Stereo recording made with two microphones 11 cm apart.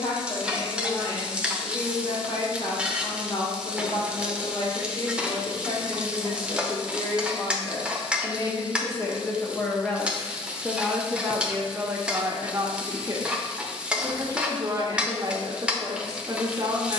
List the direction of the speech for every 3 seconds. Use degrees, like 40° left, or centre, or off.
60° left, 50° left, 40° left, centre, 30° right, 30° right.